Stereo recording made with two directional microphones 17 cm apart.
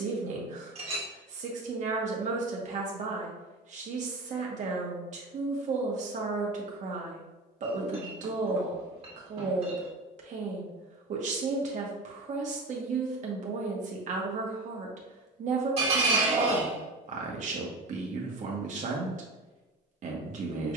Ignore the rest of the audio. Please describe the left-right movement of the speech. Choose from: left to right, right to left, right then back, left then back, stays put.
stays put.